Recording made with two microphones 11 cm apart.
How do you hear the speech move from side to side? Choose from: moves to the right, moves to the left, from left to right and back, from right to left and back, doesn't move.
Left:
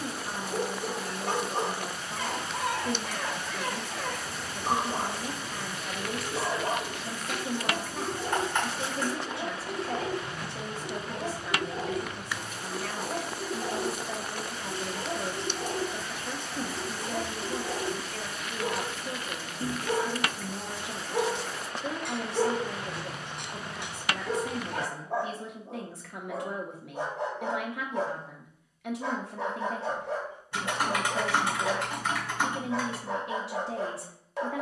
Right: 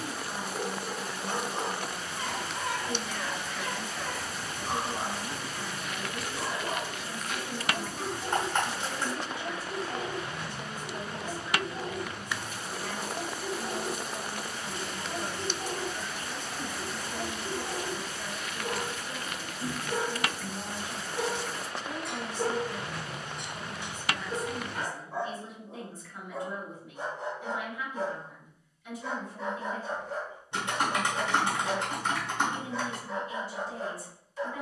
doesn't move.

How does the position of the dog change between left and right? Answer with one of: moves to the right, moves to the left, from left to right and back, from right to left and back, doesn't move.
doesn't move.